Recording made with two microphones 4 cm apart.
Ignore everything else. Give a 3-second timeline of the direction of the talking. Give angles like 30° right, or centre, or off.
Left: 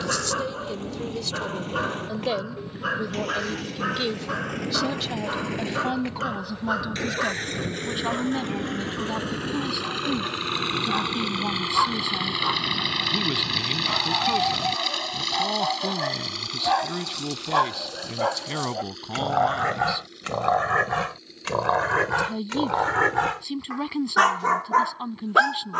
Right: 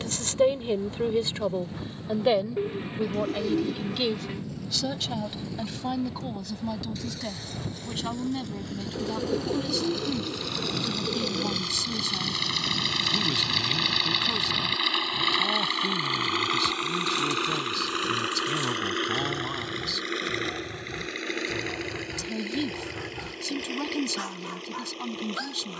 30° right, centre, 20° left, 20° left, 20° left, 20° left, 20° left, 20° left, 20° left.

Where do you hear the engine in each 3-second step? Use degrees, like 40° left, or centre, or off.
70° left, 60° left, 50° left, 40° left, centre, 40° right, 60° right, 70° right, 80° right.